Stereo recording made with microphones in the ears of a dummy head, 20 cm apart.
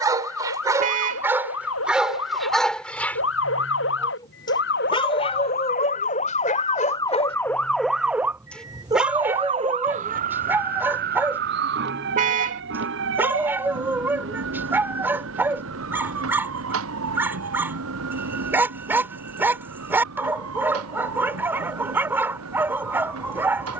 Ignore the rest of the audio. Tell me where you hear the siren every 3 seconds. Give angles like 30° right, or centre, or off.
70° left, 50° left, 10° left, 40° right, 60° right, 70° right, 70° right, 70° right.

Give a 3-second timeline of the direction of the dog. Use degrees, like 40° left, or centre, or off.
10° right, 20° left, 30° left, 10° right, 10° right, 10° right, 10° right, 10° right.